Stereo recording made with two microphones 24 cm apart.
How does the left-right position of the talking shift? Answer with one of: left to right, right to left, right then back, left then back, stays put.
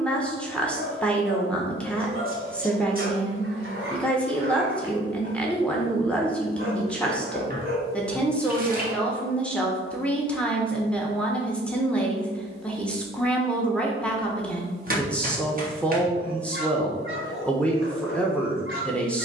stays put.